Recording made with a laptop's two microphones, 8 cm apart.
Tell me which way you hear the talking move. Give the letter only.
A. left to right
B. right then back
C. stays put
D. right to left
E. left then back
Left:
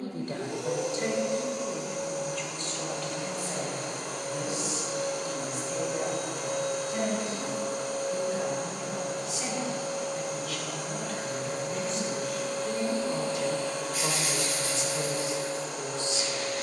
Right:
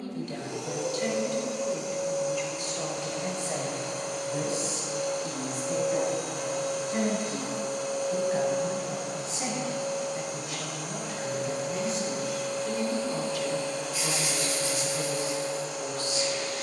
B.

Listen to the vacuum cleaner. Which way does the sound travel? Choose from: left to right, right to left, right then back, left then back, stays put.
stays put.